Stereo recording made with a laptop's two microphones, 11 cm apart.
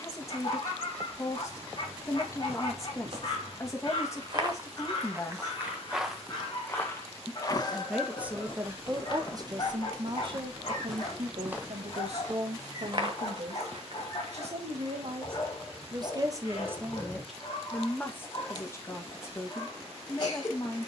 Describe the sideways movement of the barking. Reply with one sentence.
In this clip you hear the barking stay in one place.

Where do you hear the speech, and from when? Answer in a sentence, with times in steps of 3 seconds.
You can hear the speech on the left from 0 s, in the centre from 6 s, on the right from 9 s and on the left from 18 s.